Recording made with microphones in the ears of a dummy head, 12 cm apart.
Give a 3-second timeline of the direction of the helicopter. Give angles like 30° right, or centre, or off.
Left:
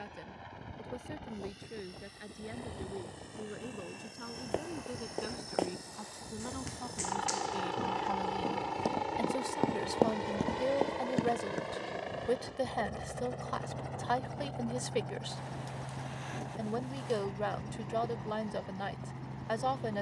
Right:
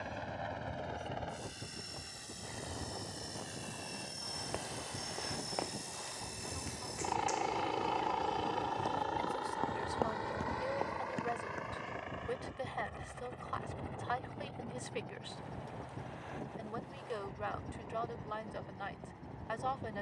60° right, 40° right, 10° right, 20° left, 40° left, 60° left, 60° left.